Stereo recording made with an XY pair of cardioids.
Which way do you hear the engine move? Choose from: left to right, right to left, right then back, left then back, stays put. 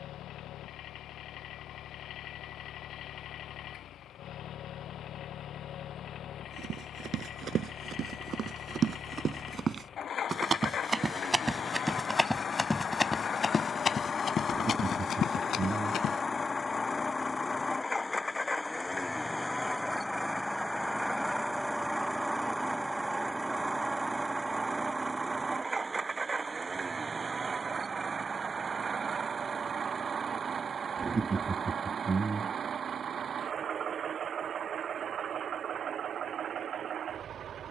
left to right.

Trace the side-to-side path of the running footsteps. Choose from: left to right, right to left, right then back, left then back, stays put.
right to left.